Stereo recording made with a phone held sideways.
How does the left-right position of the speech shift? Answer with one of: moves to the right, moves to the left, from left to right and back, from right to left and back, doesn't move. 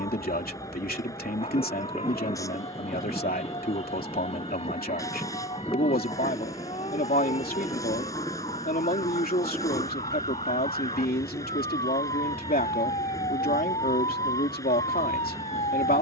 doesn't move.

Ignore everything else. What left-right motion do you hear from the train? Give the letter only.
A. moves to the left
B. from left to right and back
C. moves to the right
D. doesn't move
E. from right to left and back
D.